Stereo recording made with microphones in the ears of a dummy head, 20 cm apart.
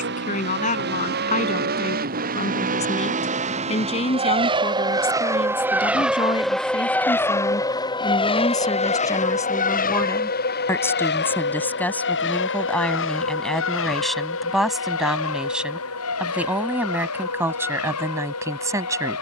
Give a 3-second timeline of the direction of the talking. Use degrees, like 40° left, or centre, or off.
30° left, 30° left, 20° left, 10° left, centre, 10° right, 10° right.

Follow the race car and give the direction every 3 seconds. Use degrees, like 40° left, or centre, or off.
50° right, 20° right, 10° left, 40° left, 60° left, 70° left, 70° left.